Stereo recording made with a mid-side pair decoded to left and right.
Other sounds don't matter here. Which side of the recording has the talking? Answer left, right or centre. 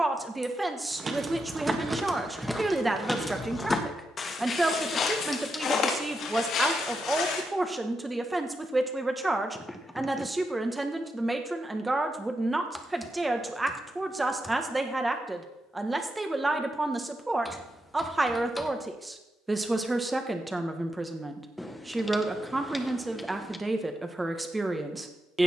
centre.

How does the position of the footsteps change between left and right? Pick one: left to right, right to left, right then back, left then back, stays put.
right to left.